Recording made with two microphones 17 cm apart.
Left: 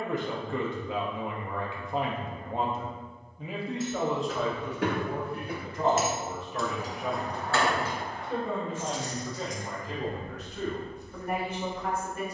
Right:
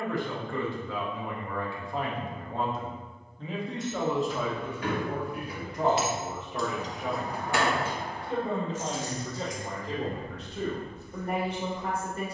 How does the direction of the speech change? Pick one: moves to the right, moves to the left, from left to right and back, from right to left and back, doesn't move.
moves to the right.